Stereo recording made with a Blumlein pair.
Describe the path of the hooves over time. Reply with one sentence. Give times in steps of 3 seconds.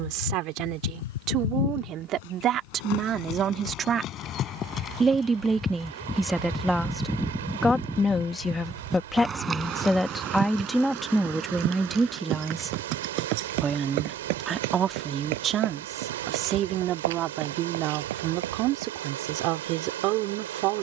In this clip you hear the hooves on the left from 0 s, in the centre from 6 s and on the right from 9 s.